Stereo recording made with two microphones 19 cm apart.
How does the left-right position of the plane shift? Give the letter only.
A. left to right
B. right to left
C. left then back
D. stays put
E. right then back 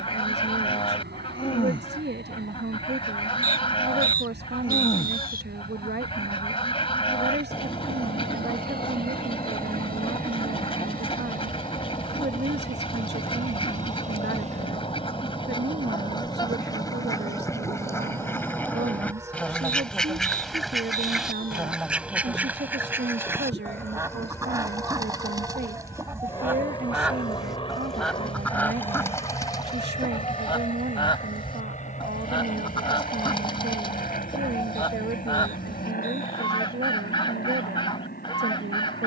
B.